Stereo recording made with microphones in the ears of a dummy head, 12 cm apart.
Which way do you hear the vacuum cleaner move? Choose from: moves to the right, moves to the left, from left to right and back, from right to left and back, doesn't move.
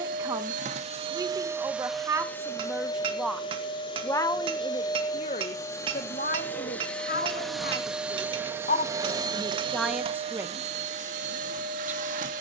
from right to left and back.